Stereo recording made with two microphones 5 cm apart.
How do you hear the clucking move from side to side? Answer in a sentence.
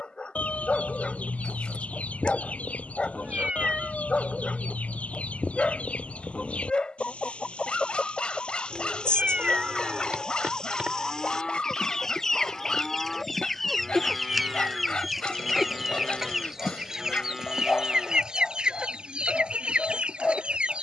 In this clip you hear the clucking travel towards the right.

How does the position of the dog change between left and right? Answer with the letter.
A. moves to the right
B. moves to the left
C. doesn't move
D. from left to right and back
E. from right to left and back
C.